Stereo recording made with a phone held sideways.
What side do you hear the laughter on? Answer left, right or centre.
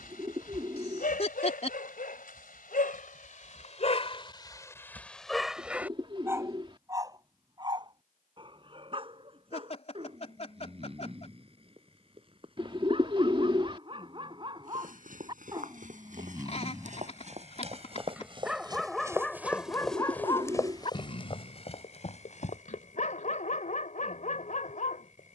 left.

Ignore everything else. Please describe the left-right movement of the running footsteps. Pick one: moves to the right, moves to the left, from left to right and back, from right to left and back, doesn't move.
moves to the left.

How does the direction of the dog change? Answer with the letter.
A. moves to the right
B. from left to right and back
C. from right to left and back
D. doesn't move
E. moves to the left
B.